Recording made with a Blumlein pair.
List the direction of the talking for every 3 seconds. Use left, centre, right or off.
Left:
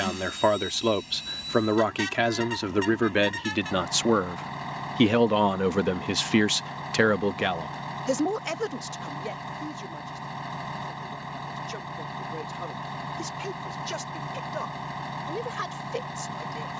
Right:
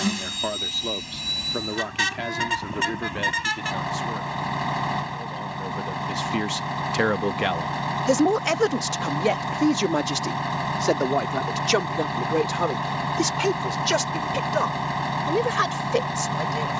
left, left, centre, right, right, right.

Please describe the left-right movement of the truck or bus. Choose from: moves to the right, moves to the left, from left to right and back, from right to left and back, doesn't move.
doesn't move.